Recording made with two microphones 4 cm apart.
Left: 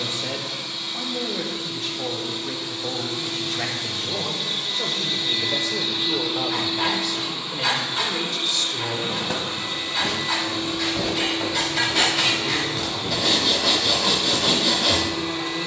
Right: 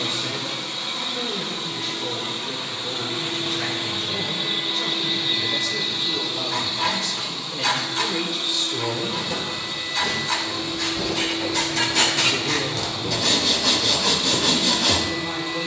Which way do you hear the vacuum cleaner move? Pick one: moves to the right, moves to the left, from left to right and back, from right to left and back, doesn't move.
moves to the left.